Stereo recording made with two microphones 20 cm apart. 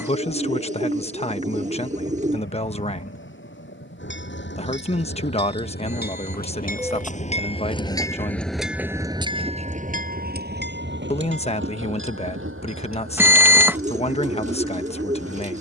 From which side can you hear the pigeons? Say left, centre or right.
right.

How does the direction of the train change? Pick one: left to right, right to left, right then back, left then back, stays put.
left to right.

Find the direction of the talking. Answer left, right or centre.
left.